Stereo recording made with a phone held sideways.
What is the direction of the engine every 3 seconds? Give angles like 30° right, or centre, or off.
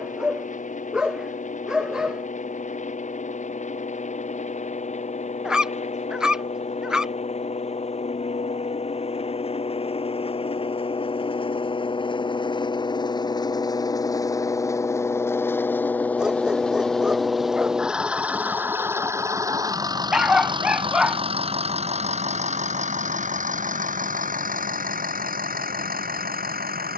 50° left, 50° left, 50° left, 40° left, 30° left, 10° left, 20° right, 50° right, 60° right.